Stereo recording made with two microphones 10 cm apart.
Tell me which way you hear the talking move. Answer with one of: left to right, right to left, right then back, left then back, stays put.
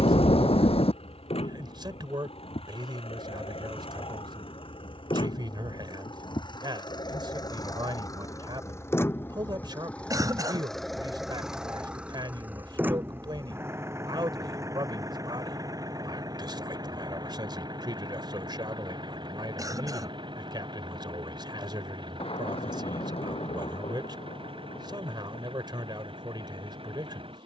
stays put.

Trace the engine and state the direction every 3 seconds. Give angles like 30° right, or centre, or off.
70° left, 60° left, 40° left, 10° left, 20° right, 40° right, 50° right, 60° right, 60° right.